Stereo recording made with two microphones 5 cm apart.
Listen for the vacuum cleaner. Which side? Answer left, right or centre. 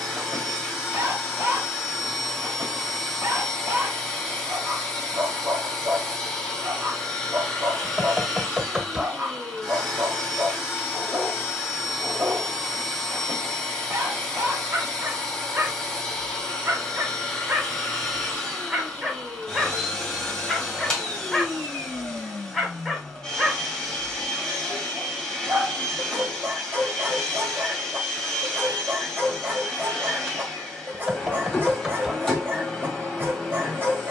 centre.